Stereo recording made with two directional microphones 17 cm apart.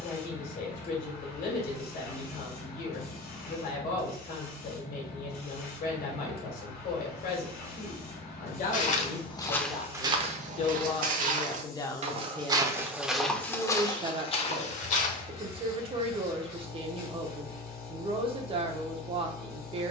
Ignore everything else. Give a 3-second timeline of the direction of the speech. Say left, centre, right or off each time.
left, left, left, left, centre, right, right.